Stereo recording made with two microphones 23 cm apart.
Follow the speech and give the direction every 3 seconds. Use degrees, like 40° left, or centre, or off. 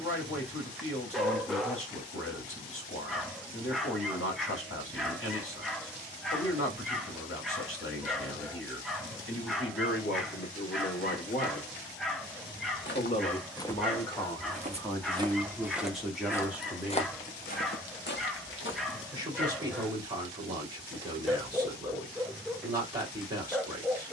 60° left, 60° left, 60° left, 50° left, 20° left, centre, 20° right, 20° right.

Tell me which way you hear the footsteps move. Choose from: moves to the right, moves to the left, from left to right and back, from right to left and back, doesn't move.
from left to right and back.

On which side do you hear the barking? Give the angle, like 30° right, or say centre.
centre.